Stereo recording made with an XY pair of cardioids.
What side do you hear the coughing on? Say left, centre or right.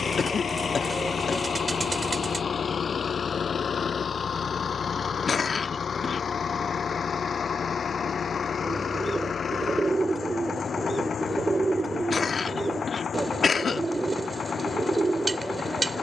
left.